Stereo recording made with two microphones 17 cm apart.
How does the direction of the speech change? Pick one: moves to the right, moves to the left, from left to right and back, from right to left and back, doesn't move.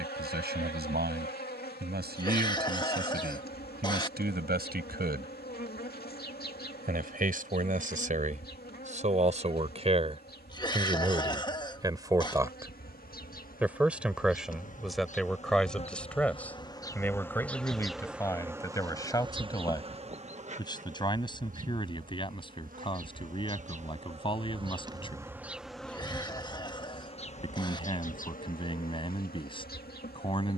moves to the left.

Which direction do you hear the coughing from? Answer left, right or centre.
left.